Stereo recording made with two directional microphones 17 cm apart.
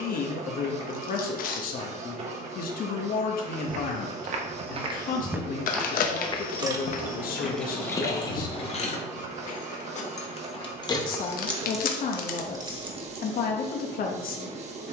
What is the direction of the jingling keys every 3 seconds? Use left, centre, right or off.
off, off, centre, left, right.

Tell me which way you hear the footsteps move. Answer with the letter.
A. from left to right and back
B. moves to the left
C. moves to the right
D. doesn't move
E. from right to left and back
B.